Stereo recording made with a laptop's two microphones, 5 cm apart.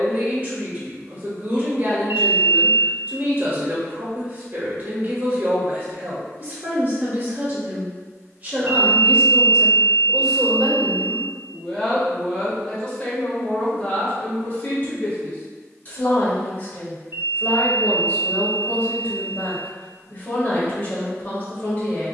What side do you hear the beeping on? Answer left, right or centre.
right.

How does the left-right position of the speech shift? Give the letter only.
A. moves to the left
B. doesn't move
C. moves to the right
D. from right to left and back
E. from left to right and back
A.